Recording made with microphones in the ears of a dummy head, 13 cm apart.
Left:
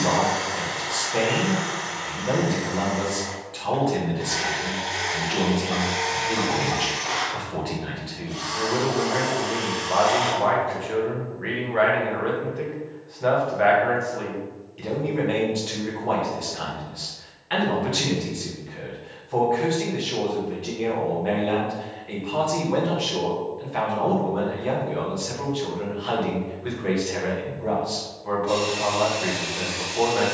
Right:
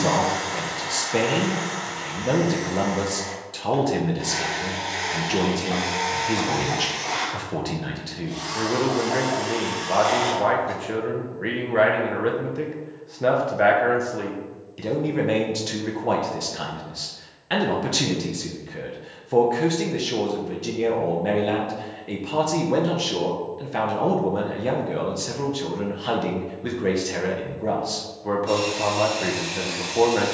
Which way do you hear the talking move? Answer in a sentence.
In this clip you hear the talking stay put.